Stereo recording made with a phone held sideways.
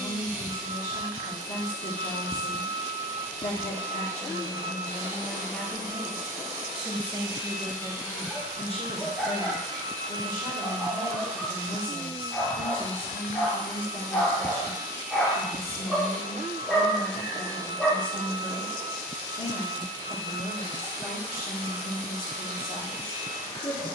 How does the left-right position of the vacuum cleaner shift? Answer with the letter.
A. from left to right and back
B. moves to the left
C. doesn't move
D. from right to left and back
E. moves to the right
B.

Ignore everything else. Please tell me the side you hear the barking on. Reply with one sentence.
In this clip you hear the barking in the centre.